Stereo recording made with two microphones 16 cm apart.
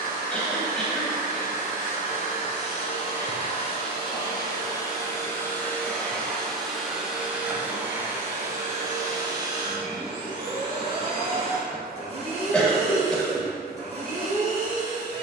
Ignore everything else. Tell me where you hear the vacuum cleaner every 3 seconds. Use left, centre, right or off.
left, left, centre, right, right.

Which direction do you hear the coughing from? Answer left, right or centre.
centre.